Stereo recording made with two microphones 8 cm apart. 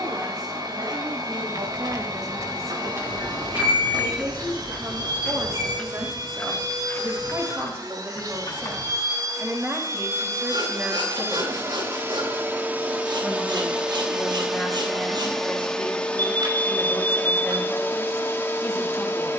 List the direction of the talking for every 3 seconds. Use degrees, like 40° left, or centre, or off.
50° right, 50° right, 30° right, 20° right, centre, 10° left, 20° left.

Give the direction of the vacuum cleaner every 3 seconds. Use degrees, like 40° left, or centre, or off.
60° right, 60° right, 60° right, 40° right, 20° right, 20° left, 30° left.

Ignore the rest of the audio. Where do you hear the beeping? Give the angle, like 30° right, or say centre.
60° right.